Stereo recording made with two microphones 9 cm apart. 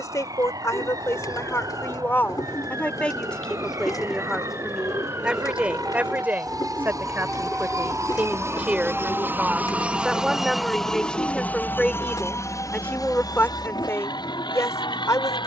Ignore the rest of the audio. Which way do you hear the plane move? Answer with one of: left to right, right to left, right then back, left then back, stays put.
right to left.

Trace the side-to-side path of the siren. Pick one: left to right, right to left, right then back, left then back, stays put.
right to left.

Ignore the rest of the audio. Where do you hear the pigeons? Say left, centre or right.
left.